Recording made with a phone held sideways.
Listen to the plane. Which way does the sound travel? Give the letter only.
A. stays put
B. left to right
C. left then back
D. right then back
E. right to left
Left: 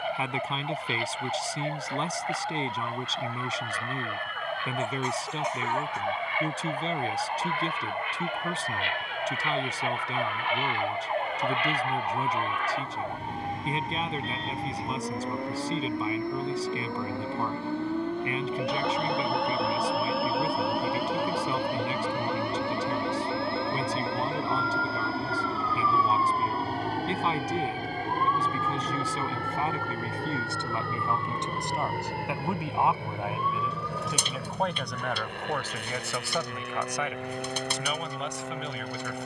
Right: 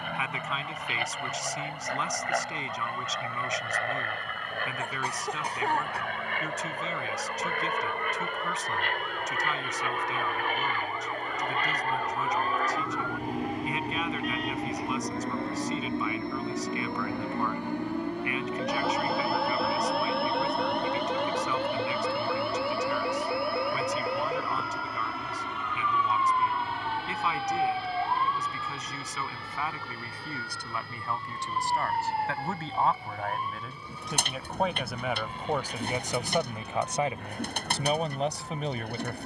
E.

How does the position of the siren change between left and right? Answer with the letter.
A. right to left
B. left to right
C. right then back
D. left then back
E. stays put
B.